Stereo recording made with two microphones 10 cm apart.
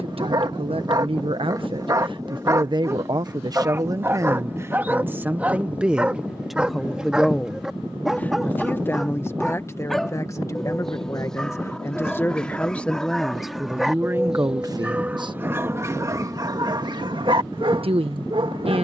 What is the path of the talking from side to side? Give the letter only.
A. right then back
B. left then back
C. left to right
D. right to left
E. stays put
B.